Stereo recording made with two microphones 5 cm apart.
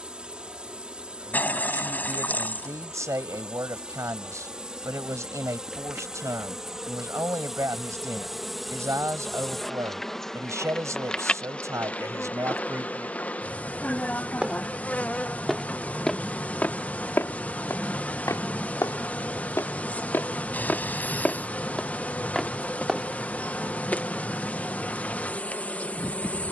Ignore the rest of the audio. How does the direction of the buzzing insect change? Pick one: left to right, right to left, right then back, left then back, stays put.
right to left.